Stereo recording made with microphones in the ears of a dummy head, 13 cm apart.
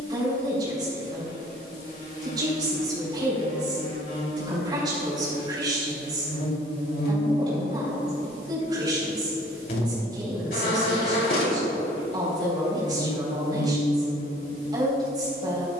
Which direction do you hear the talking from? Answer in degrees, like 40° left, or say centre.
30° right.